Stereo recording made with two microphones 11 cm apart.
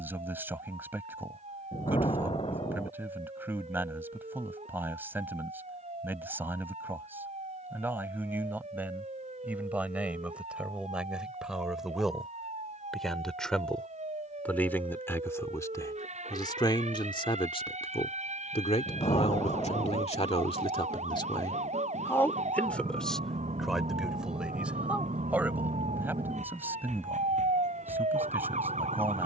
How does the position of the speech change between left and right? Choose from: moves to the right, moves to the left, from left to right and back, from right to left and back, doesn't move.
from right to left and back.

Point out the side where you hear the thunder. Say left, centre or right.
left.